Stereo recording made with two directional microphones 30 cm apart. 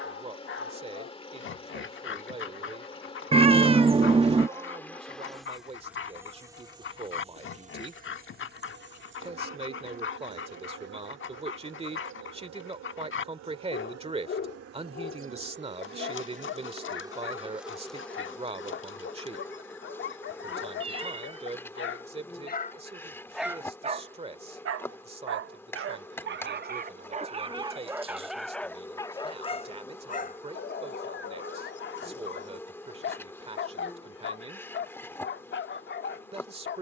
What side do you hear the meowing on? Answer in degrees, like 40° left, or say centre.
20° right.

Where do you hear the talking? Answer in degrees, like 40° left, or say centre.
20° right.